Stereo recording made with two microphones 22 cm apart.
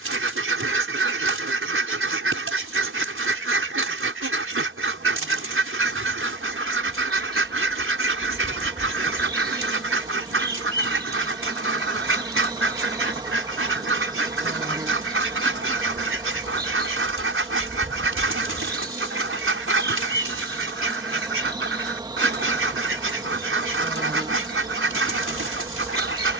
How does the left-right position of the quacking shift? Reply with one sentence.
In this clip you hear the quacking stay in one place.